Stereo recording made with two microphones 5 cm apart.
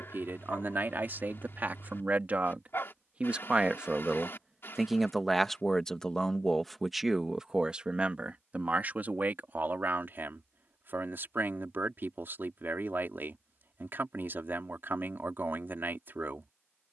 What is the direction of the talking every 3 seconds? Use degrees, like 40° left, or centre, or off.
40° right, 10° right, 10° right, 50° right, 50° right, 50° right.